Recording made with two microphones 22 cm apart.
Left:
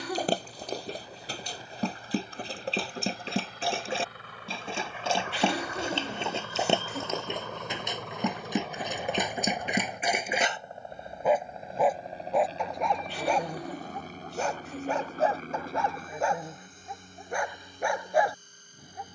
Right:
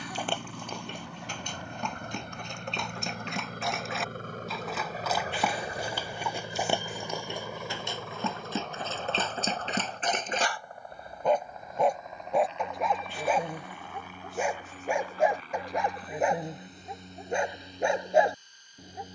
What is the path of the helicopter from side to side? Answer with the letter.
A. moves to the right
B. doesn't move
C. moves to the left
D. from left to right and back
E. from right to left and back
C.